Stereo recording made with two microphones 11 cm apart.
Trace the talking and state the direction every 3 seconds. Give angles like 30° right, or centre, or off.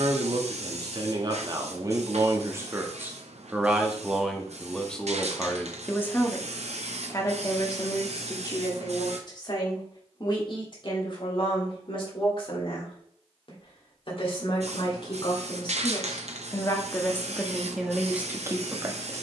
40° right, centre, 30° left, 50° left, 50° left, 30° left, 20° right.